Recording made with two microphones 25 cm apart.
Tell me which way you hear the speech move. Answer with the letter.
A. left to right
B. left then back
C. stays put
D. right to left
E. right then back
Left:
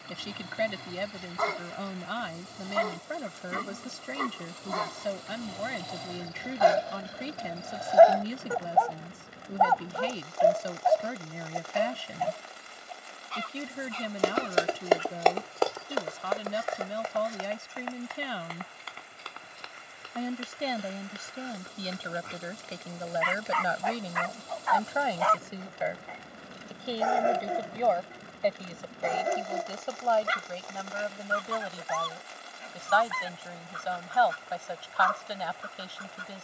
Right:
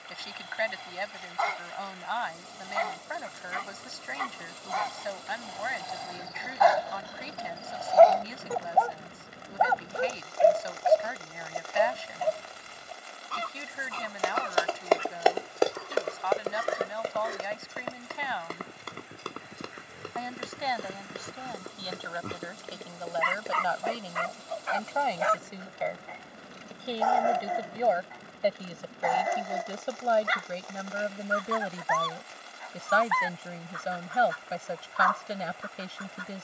A.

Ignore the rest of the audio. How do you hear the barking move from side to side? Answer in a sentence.
You can hear the barking go right and come back.